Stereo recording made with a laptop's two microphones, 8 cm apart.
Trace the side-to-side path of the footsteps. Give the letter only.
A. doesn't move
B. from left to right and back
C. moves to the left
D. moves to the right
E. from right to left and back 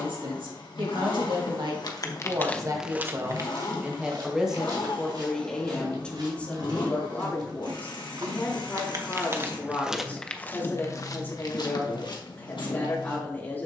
B.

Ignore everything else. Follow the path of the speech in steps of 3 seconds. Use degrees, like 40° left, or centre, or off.
60° right, 10° right, 20° left, 30° left, 30° left.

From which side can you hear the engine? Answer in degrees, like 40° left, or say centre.
70° left.